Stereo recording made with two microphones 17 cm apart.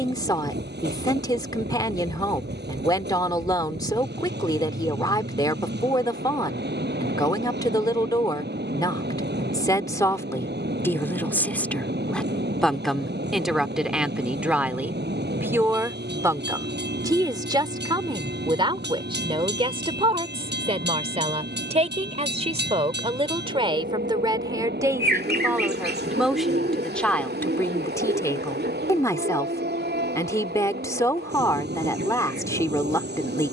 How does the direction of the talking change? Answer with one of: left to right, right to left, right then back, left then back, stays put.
right then back.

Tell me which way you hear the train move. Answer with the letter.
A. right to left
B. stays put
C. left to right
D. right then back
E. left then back
B.